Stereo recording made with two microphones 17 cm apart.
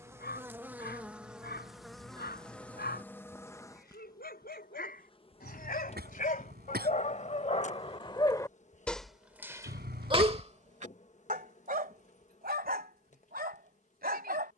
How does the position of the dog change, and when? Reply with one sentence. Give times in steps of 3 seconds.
You can hear the dog on the left from 0 s and on the right from 9 s.